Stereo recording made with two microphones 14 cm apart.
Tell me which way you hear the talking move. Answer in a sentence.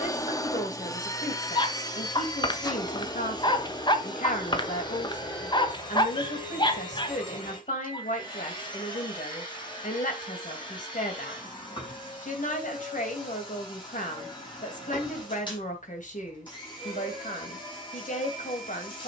In this clip you hear the talking stay put.